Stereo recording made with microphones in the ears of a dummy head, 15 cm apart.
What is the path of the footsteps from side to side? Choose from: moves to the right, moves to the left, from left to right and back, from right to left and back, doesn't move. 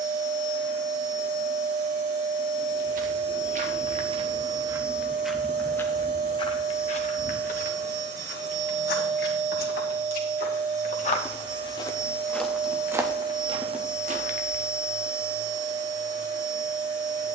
from right to left and back.